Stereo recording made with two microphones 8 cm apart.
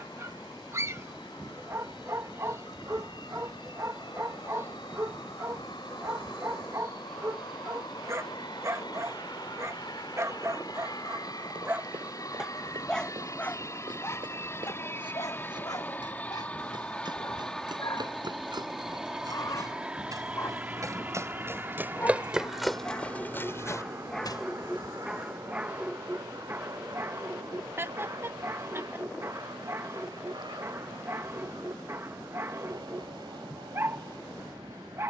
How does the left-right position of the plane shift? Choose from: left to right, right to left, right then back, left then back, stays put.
left to right.